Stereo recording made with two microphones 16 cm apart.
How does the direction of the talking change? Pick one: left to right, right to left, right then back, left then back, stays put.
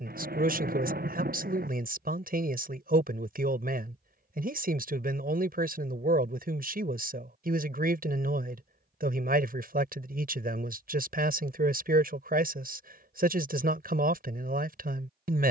stays put.